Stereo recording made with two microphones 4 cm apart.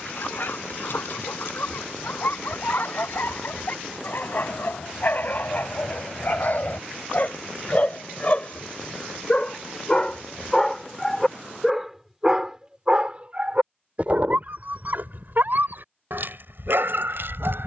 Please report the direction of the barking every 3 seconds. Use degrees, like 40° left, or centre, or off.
60° left, 50° left, 40° left, 10° left, 40° right, 60° right.